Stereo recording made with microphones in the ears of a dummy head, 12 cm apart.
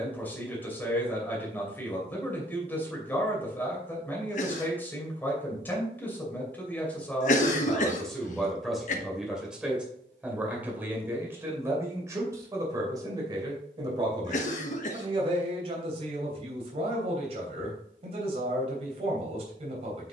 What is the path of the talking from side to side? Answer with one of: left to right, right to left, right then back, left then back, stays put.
left to right.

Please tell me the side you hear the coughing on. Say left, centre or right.
left.